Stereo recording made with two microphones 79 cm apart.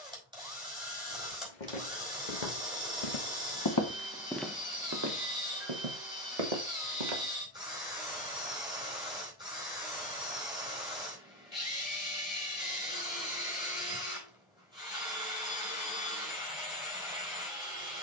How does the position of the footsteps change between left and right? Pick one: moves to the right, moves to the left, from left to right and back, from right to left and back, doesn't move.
moves to the right.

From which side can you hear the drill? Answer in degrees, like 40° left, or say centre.
10° right.